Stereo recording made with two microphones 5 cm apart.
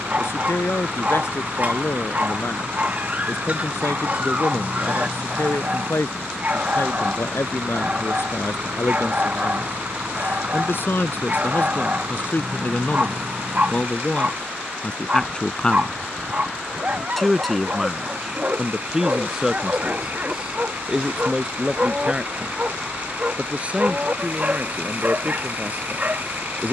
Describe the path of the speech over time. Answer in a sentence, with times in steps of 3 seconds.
You can hear the speech on the left from 0 s, in the centre from 15 s and on the right from 21 s.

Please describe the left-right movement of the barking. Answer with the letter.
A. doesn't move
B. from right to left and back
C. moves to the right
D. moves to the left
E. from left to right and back
A.